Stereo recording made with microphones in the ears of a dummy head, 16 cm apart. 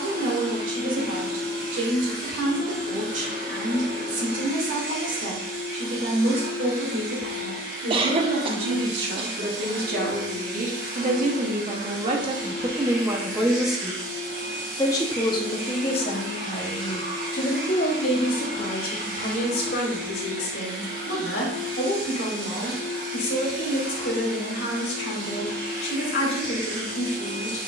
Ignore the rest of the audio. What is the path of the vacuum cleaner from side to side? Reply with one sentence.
In this clip you hear the vacuum cleaner stay put.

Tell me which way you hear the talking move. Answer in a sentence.
In this clip you hear the talking move to the left.